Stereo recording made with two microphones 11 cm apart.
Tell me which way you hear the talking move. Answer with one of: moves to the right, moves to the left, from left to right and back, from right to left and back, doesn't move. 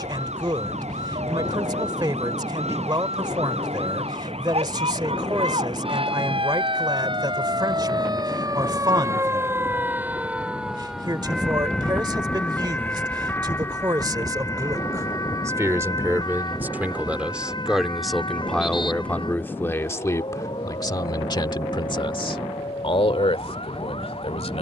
moves to the left.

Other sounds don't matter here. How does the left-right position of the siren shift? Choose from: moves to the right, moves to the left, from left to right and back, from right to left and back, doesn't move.
moves to the left.